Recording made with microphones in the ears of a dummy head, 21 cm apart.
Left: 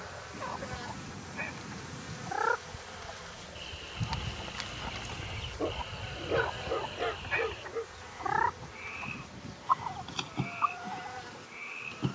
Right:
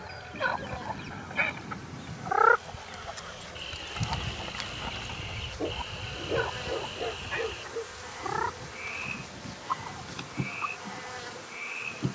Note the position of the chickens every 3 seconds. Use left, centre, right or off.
right, centre, left, left.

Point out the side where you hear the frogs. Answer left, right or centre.
centre.